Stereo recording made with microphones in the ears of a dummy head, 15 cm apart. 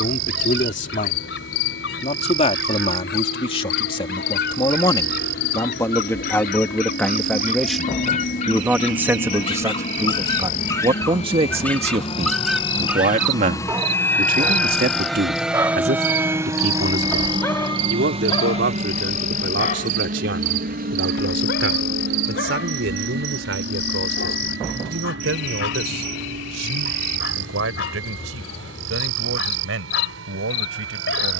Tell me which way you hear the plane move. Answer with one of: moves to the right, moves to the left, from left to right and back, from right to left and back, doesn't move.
moves to the right.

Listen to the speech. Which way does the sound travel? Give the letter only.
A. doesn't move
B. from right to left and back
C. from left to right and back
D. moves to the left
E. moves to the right
E.